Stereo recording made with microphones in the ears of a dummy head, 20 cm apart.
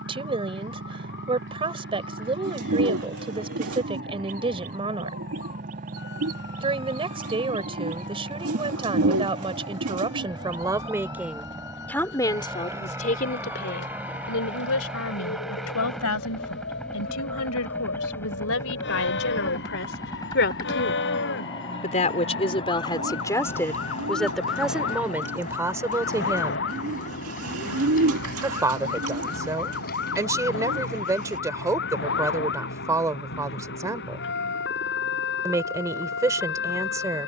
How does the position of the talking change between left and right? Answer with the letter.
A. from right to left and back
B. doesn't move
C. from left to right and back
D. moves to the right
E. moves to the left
A.